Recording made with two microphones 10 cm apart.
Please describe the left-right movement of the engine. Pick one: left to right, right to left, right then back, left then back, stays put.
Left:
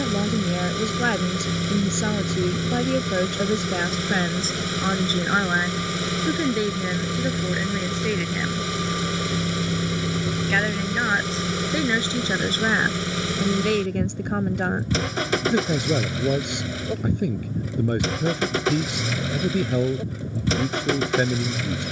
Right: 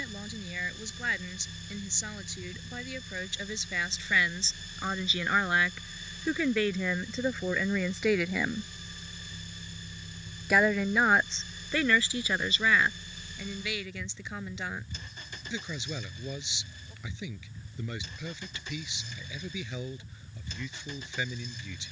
stays put.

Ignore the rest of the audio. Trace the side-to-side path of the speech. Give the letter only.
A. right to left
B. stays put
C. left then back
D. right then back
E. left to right
D.